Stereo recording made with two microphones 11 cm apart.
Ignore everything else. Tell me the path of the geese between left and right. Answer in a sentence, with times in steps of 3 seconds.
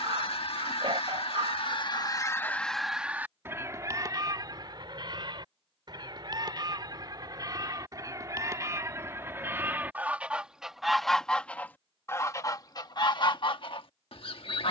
In this clip you hear the geese on the left from 0 s, on the right from 3 s, in the centre from 9 s and on the left from 12 s.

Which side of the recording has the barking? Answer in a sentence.
You can hear the barking on the right.